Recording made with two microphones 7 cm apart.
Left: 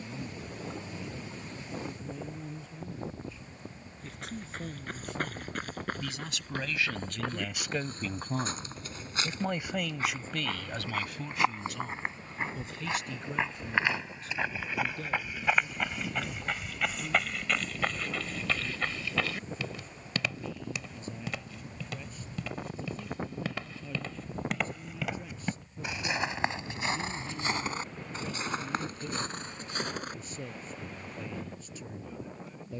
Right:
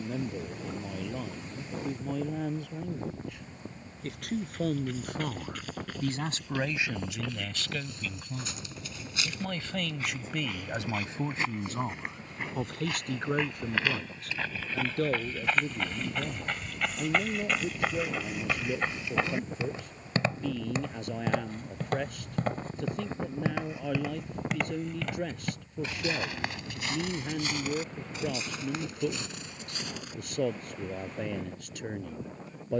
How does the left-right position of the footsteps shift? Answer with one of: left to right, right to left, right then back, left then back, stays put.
right then back.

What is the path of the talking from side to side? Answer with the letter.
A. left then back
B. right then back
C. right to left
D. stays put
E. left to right
A.